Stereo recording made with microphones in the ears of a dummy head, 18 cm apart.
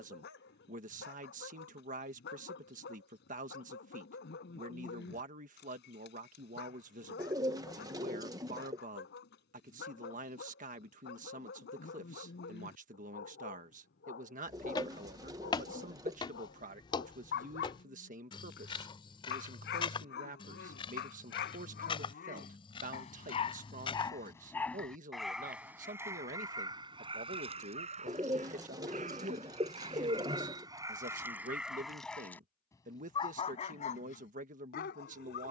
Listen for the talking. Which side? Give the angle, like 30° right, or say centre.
40° right.